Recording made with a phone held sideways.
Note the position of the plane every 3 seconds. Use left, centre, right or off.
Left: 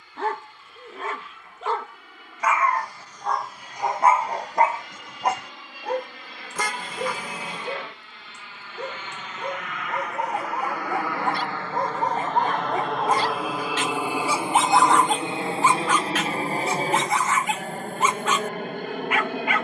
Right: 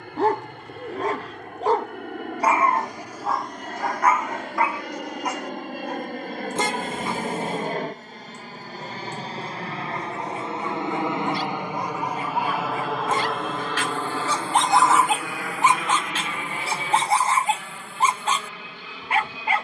right, right, right, right, centre, left, left.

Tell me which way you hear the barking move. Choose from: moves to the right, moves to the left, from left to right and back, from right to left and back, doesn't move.
from right to left and back.